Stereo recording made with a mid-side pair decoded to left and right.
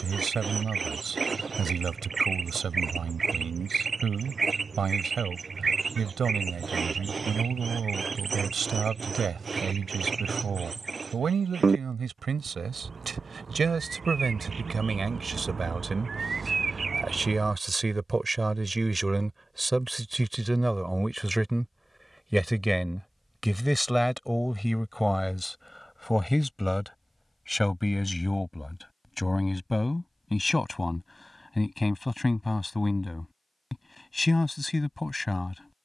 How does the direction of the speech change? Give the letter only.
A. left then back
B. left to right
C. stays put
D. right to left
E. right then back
D.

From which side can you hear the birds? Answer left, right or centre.
right.